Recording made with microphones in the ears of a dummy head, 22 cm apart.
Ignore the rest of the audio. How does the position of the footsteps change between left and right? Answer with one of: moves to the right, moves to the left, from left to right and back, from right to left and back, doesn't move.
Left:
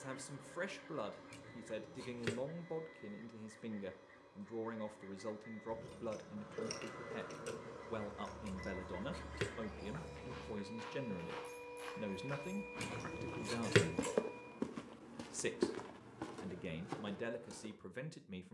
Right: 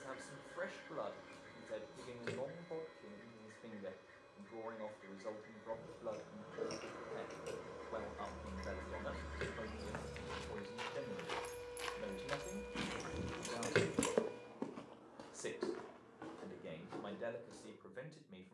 moves to the left.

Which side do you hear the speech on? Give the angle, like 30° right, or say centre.
40° left.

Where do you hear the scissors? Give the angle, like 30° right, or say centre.
40° left.